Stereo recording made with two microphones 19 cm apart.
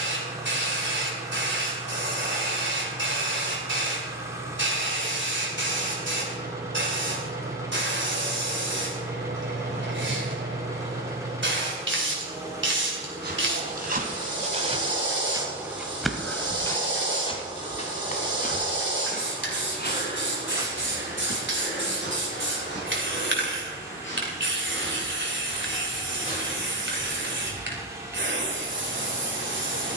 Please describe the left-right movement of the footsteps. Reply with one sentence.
You can hear the footsteps move to the left.